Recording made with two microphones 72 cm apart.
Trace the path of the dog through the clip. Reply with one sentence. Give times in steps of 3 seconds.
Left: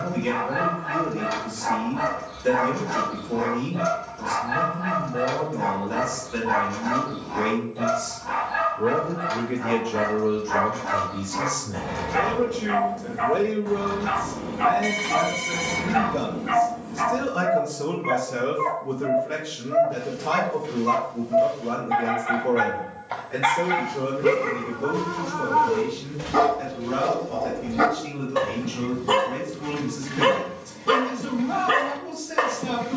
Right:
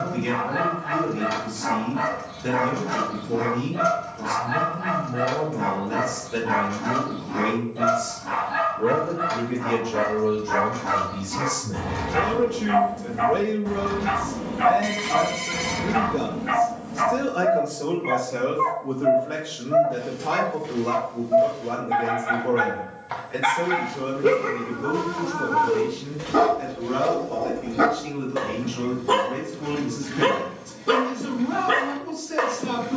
You can hear the dog on the right from 0 s and on the left from 18 s.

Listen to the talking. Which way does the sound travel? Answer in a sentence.
You can hear the talking move to the left.